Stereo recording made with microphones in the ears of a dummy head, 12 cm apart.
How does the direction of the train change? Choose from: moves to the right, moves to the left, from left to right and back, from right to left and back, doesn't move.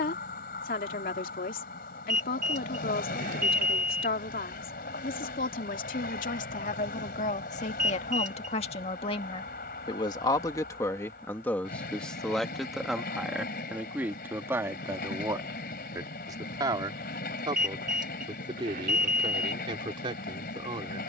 doesn't move.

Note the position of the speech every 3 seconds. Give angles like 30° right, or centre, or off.
70° left, 70° left, 60° left, 20° left, 10° right, 30° right, 40° right.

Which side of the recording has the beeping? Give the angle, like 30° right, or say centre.
60° right.